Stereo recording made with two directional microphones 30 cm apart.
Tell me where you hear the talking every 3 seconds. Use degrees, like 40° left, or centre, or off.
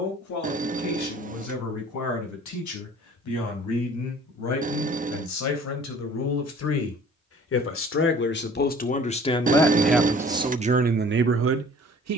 70° left, 60° left, 40° left, 10° right.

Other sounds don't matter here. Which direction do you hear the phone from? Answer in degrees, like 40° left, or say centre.
20° right.